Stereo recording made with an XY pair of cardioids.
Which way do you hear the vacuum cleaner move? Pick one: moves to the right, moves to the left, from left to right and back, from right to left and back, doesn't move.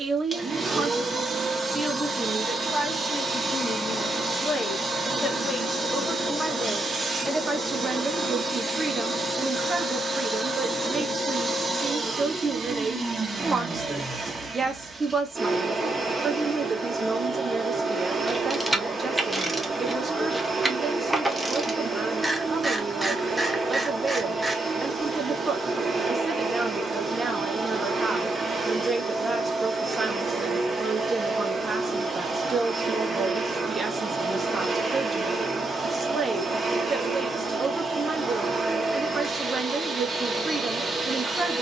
doesn't move.